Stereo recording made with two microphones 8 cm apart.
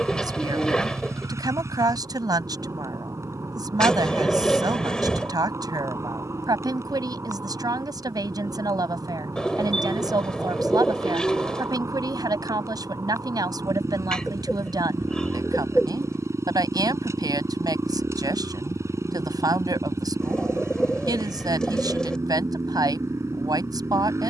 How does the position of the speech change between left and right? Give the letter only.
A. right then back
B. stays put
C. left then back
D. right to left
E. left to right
B.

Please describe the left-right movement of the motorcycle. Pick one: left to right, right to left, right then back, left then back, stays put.
stays put.